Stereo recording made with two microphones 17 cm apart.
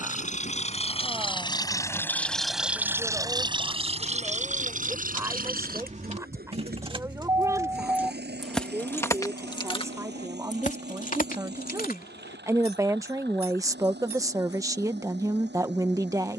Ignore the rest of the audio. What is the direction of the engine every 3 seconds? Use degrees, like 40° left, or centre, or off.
20° left, 40° right, 70° right, 80° right, 80° right, 80° right.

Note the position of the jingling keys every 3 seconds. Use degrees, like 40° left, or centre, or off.
70° right, 50° right, 20° right, 40° left, 70° left, off.